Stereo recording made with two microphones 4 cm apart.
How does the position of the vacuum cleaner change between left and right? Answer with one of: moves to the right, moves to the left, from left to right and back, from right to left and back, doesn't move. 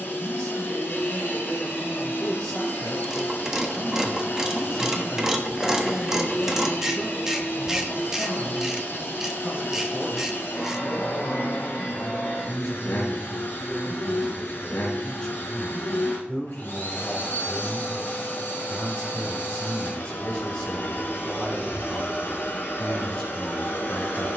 doesn't move.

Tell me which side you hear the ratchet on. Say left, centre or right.
centre.